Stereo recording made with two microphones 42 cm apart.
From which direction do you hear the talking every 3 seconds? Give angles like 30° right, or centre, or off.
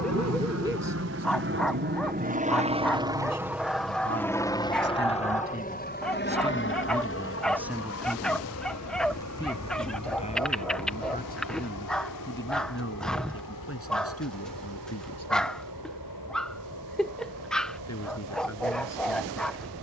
50° right, 30° right, 10° right, 20° left, 30° left, 40° left, 40° left.